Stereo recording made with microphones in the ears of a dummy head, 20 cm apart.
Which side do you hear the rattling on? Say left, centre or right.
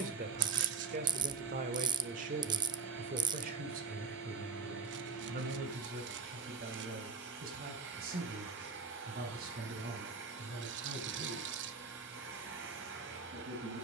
right.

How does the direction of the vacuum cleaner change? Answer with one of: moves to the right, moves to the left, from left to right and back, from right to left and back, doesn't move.
doesn't move.